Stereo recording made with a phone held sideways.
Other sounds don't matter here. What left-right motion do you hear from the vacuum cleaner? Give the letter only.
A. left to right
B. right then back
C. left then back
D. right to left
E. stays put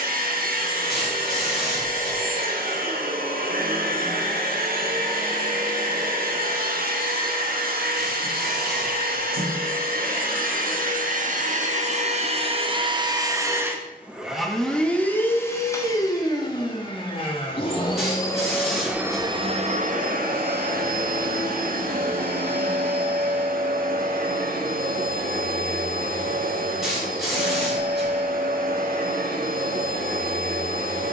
C.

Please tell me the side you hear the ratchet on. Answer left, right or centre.
centre.